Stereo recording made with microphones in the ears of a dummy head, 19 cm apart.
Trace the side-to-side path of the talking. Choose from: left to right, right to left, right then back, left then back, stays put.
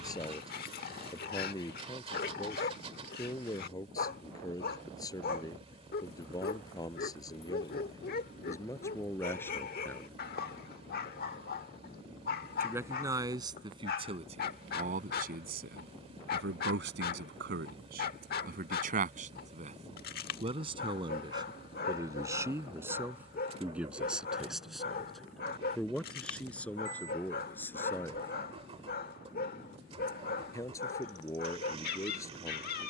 right then back.